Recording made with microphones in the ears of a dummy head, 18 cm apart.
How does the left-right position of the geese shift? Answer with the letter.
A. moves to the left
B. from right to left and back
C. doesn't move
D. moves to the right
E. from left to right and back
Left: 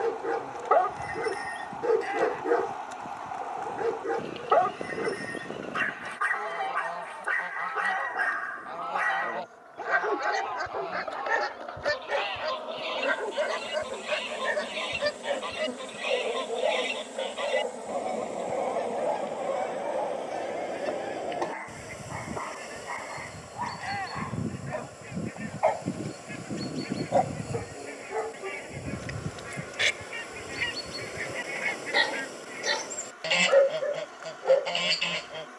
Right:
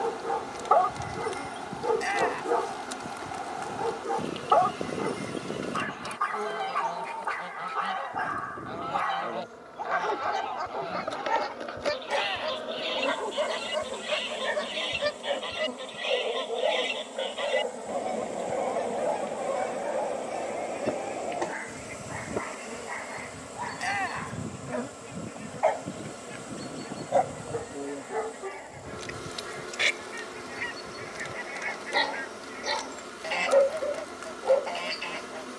A.